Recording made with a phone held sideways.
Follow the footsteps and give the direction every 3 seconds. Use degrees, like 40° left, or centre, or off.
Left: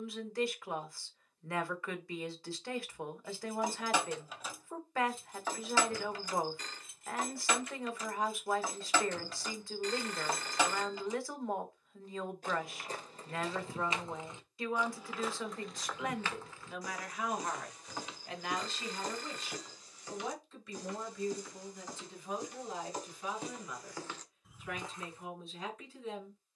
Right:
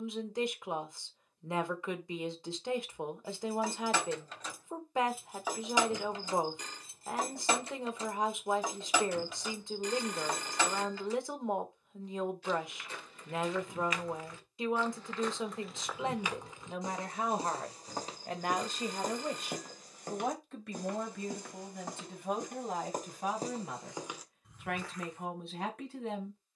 off, off, off, off, 30° left, 20° right, 50° right, 50° right, 10° left.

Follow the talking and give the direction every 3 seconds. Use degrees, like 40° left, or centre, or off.
20° right, 20° right, 20° right, 20° right, 20° right, 30° right, 50° right, 60° right, 70° right.